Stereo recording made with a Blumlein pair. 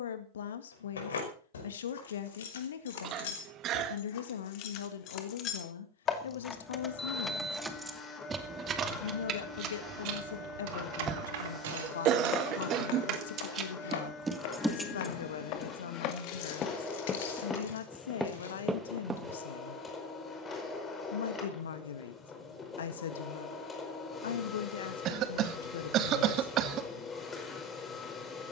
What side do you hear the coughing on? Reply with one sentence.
You can hear the coughing on the right.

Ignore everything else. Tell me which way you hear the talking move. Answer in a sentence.
You can hear the talking stay put.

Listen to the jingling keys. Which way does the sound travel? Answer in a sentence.
In this clip you hear the jingling keys move from left to right and back again.